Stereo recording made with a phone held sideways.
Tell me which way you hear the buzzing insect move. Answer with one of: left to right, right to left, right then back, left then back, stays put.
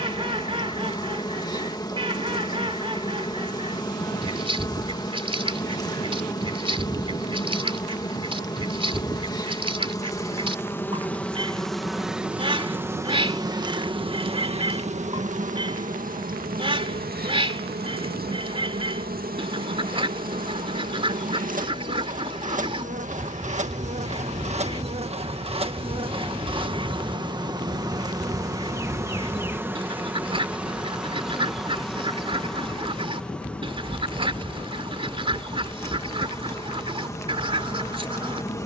right then back.